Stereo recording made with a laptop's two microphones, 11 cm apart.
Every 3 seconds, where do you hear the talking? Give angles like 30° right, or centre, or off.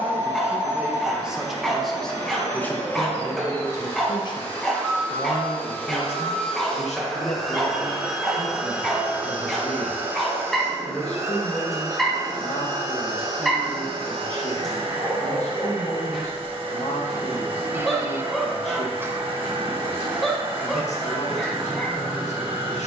centre, 40° left, 70° left, 80° left, 80° left, 80° left, 80° left, 80° left.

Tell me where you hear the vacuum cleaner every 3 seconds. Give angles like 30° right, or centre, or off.
20° left, 20° left, centre, 20° right, 50° right, 50° right, 50° right, 50° right.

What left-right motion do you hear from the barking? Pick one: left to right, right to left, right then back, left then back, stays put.
stays put.